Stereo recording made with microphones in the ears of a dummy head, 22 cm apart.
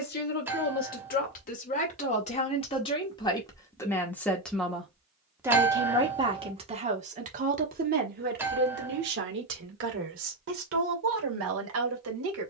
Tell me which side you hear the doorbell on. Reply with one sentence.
In this clip you hear the doorbell in the centre.